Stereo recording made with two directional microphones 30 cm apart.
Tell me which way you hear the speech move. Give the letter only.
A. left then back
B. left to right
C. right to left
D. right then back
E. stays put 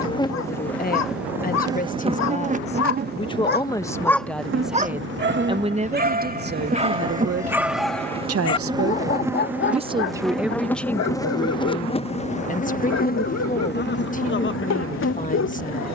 D.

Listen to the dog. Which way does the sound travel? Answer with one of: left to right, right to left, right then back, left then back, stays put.
right then back.